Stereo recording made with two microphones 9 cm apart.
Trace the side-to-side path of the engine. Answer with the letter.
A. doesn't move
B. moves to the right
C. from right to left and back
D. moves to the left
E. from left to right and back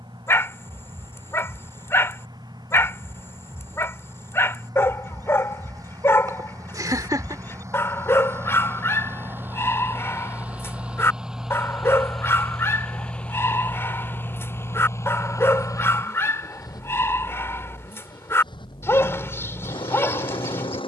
D.